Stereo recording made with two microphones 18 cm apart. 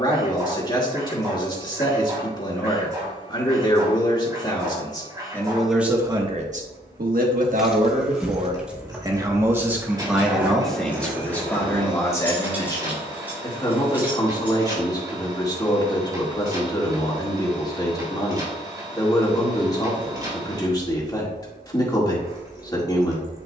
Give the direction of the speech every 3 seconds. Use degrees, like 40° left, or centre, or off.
20° left, 20° left, 40° right, centre, 20° left, 20° left, 20° left, 20° left.